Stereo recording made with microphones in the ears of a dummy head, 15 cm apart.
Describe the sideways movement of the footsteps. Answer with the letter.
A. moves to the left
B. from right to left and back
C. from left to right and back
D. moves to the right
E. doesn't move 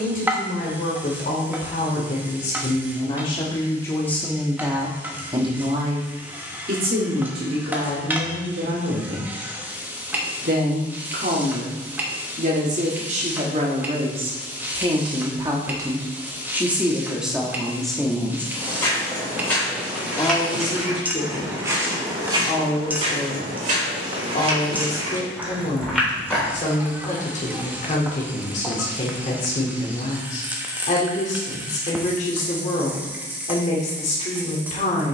C.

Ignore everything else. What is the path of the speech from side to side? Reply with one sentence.
In this clip you hear the speech move from left to right and back again.